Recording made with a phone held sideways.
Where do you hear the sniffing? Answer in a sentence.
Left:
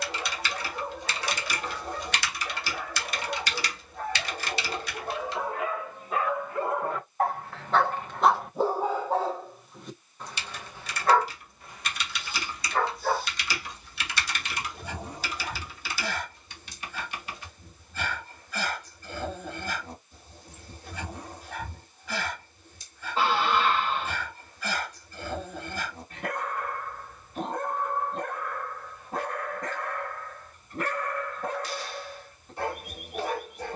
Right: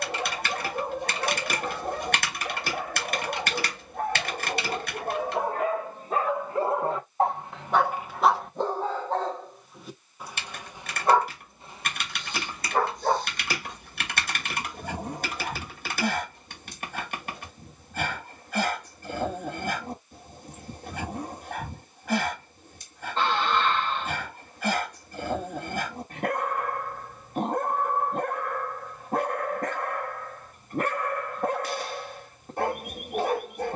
You can hear the sniffing in the centre.